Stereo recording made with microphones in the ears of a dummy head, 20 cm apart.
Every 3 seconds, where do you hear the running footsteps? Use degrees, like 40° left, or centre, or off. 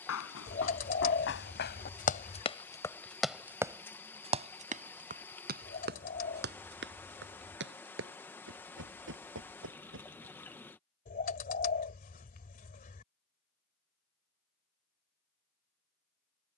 60° left, 30° right, 60° right, 60° right, off, off.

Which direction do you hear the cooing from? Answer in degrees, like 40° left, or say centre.
40° left.